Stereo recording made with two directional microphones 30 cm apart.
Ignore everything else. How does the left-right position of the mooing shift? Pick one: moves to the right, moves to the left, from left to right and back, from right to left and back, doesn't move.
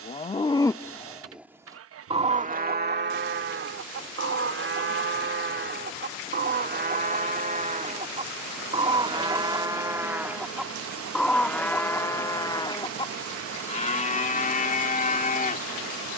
from left to right and back.